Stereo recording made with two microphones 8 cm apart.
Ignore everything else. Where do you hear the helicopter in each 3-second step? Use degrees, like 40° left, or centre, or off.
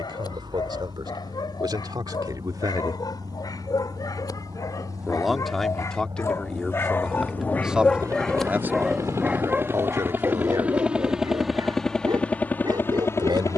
70° right, 60° right, 50° right, 20° right, 30° left.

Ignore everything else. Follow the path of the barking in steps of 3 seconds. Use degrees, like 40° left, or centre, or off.
60° left, 50° left, 20° left, 30° right, 60° right.